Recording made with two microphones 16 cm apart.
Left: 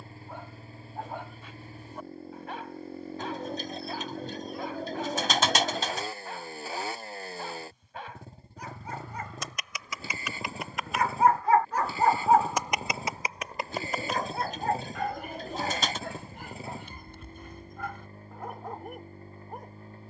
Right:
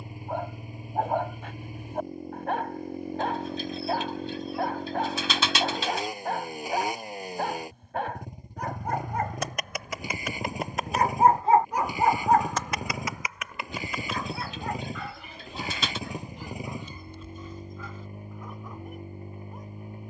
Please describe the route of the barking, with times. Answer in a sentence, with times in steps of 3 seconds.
In this clip you hear the barking on the right from 0 s and on the left from 12 s.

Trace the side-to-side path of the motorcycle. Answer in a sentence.
You can hear the motorcycle stay put.